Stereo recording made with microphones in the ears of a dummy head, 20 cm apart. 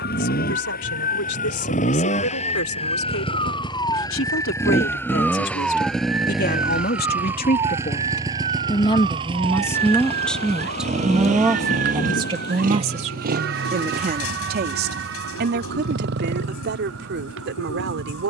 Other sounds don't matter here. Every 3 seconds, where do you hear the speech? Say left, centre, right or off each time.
left, left, left, centre, right, right.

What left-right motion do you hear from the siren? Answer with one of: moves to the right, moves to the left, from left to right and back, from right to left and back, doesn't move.
moves to the right.